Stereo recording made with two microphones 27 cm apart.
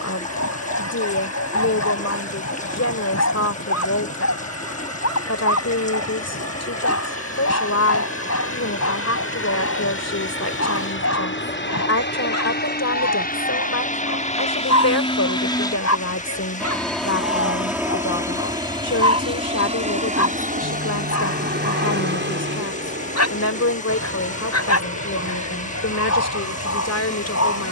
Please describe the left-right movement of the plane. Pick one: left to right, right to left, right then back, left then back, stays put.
left to right.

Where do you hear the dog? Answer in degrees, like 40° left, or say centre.
60° left.